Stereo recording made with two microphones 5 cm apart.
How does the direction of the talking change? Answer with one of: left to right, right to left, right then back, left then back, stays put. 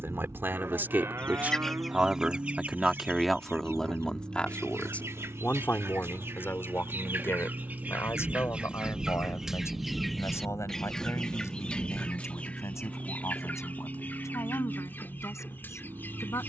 right to left.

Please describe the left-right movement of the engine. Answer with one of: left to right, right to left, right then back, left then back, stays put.
stays put.